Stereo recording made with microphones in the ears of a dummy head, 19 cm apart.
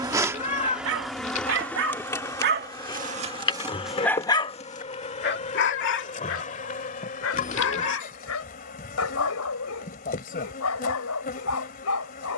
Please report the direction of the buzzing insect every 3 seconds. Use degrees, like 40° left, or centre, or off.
centre, 30° left, 40° left, 40° left.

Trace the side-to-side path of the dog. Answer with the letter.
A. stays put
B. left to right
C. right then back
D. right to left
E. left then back
D.